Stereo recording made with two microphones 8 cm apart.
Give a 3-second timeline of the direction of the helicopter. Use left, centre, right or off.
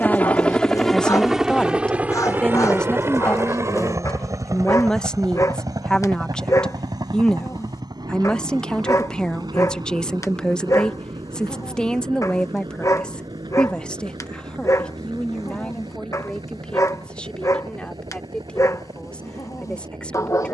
centre, right, right, right, right, right, right.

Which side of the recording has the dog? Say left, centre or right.
left.